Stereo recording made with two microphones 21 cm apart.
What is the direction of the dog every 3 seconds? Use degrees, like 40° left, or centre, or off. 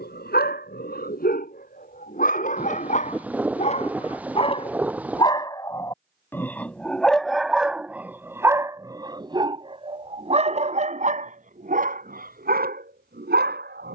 40° left, 30° left, centre, 30° right, 50° right.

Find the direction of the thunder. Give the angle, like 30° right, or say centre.
10° right.